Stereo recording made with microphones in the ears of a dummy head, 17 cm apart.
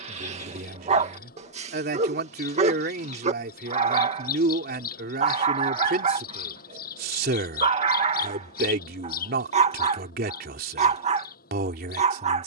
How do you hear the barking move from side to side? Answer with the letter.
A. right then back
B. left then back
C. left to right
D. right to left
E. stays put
E.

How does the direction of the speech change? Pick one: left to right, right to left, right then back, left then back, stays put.
stays put.